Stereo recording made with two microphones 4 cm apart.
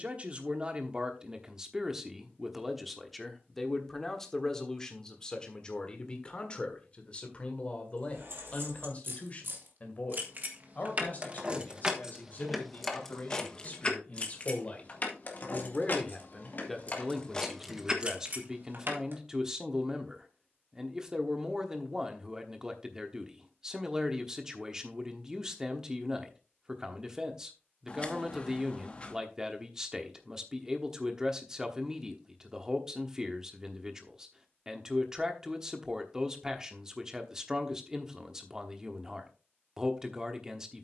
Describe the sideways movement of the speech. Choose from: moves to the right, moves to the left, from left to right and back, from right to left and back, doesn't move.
from right to left and back.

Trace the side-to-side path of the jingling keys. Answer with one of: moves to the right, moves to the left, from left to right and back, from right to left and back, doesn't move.
from right to left and back.